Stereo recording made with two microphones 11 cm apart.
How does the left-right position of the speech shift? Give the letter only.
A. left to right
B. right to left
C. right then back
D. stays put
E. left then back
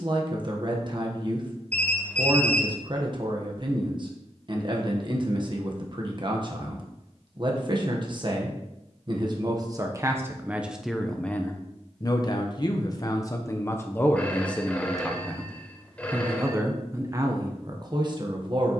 E.